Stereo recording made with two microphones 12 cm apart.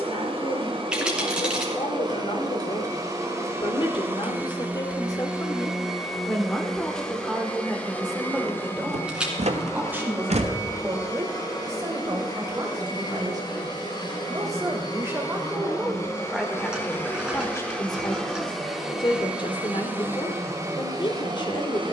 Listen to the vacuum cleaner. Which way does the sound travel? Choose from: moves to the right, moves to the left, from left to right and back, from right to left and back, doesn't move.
from right to left and back.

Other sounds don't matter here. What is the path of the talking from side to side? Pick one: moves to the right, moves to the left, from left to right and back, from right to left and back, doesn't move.
from left to right and back.